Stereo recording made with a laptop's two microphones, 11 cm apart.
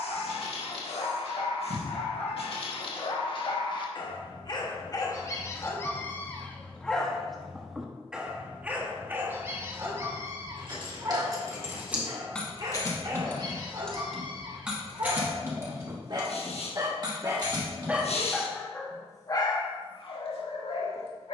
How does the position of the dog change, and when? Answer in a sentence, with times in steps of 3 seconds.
You can hear the dog on the left from 0 s, in the centre from 6 s, on the right from 9 s and on the left from 18 s.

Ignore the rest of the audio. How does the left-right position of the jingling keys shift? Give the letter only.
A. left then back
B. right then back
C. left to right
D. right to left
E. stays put
A.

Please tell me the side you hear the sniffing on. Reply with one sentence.
In this clip you hear the sniffing on the left.